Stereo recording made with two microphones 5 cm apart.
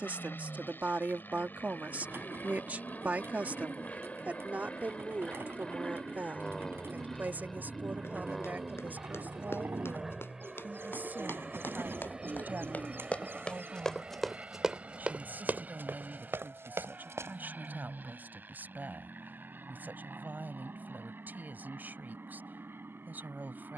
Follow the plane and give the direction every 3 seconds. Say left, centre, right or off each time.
left, left, centre, centre, right, right, right, right.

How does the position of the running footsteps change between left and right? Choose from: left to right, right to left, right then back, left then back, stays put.
left to right.